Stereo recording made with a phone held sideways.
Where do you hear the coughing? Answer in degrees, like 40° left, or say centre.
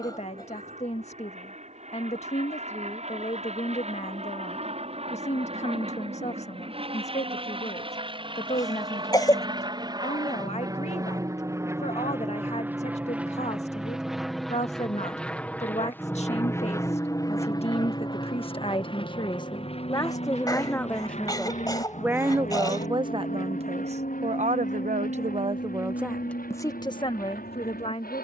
30° left.